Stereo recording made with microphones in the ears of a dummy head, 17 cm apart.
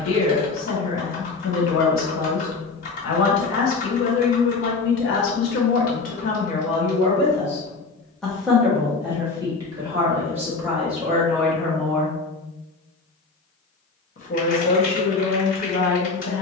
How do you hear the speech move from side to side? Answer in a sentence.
You can hear the speech move from left to right and back again.